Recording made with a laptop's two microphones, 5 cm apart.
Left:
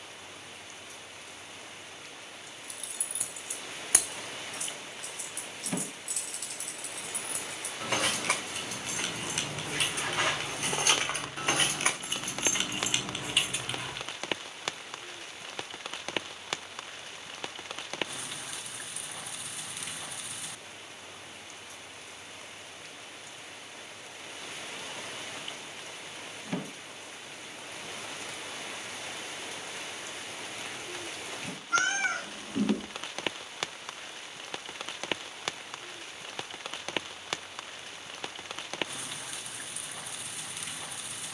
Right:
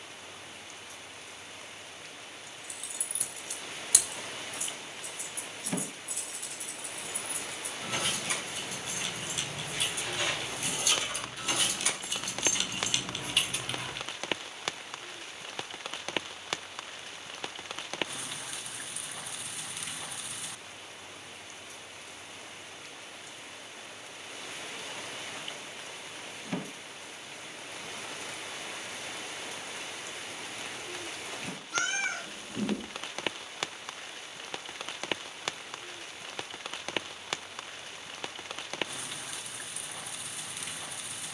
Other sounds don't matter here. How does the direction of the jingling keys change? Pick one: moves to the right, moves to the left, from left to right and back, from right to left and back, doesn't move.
from right to left and back.